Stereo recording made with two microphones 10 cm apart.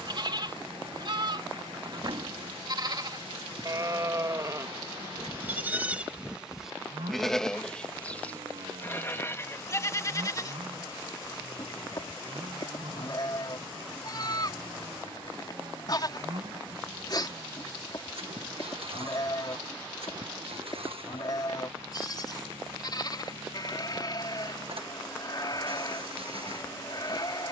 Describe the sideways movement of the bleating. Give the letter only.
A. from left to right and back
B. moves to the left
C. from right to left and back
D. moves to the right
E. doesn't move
B.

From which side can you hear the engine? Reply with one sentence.
You can hear the engine on the right.